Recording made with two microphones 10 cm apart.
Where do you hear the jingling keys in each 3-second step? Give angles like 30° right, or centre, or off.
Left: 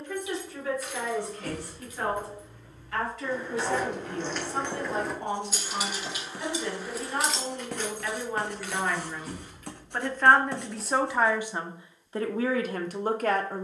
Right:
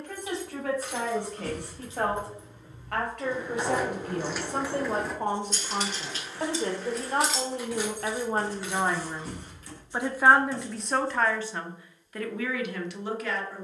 30° right, 10° right, centre, 30° right, off.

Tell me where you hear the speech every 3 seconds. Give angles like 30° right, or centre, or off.
60° right, 50° right, 40° right, centre, 40° left.